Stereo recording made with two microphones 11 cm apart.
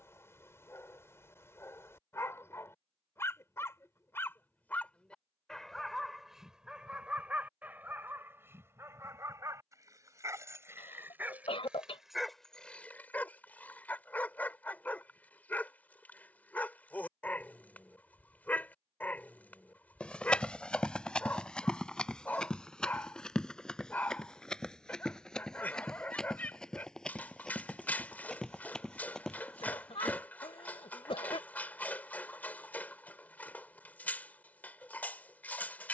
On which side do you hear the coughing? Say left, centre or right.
left.